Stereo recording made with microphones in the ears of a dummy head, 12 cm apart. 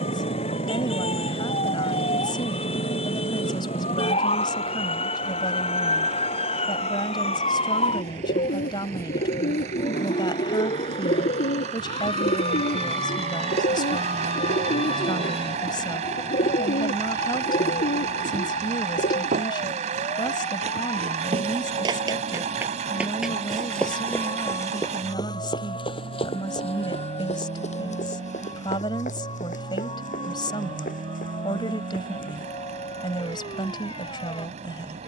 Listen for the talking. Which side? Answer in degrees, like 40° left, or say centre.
30° left.